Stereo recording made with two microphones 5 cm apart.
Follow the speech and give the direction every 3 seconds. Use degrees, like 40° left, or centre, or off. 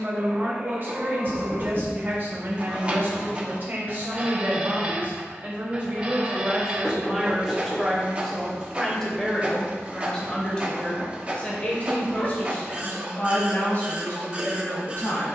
40° right, 30° right, 10° right, 20° left, 30° left.